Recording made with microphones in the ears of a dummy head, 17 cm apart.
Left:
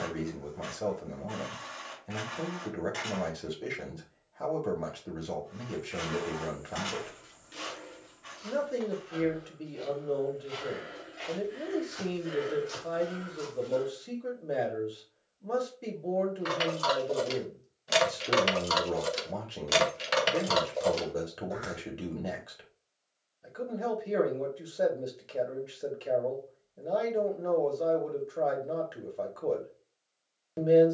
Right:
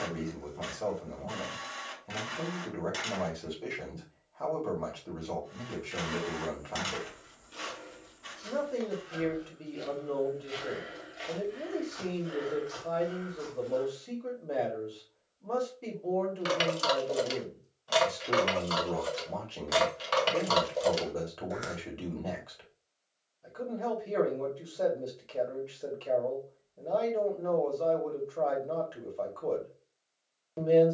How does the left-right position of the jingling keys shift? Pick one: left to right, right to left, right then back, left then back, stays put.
left then back.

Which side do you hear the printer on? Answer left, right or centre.
right.